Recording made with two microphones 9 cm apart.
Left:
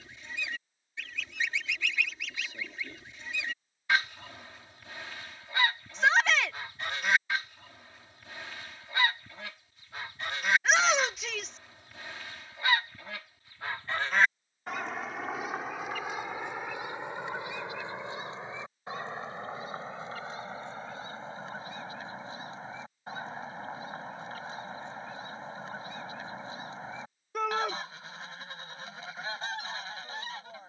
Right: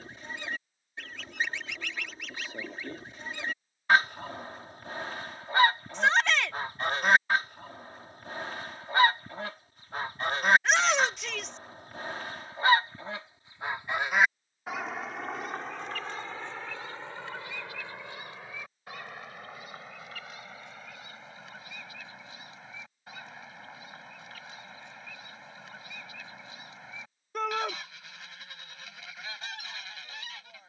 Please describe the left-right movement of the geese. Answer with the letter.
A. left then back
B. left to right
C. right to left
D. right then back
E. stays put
C.